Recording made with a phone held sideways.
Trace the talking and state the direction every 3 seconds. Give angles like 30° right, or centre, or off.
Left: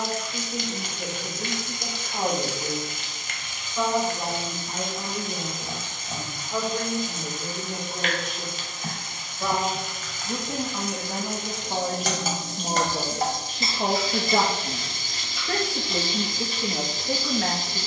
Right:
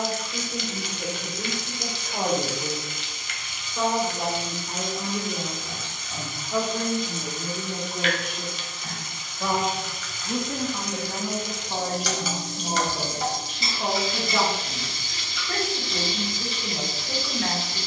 30° right, 20° right, 10° right, 10° left, 40° left, 60° left.